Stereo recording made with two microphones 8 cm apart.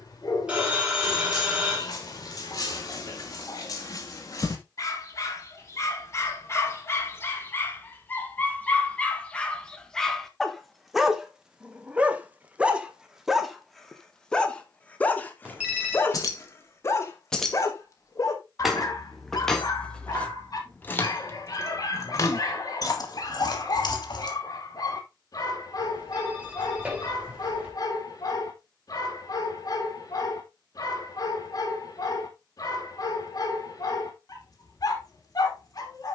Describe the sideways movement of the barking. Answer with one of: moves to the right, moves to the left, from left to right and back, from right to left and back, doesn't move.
from left to right and back.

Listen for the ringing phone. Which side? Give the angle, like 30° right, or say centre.
10° right.